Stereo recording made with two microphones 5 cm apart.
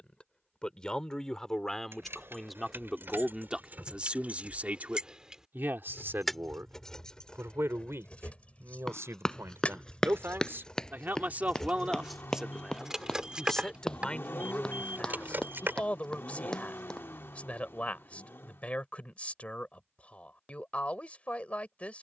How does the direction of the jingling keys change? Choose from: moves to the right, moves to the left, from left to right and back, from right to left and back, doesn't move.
from right to left and back.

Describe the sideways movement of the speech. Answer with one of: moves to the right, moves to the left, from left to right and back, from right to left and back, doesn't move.
from left to right and back.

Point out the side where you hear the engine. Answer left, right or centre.
left.